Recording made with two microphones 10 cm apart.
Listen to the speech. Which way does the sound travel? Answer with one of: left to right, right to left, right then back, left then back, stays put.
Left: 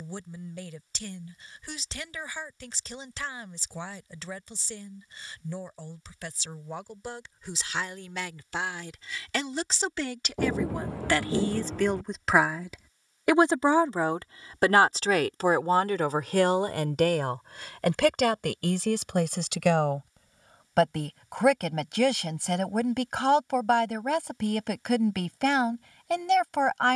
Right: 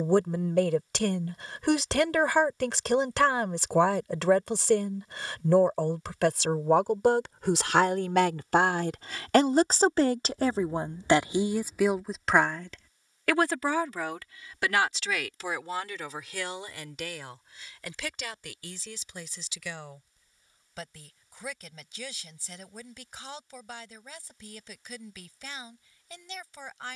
right to left.